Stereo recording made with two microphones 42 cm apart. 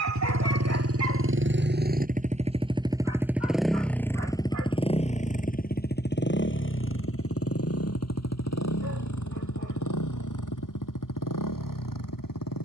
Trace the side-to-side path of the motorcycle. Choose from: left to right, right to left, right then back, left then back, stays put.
right to left.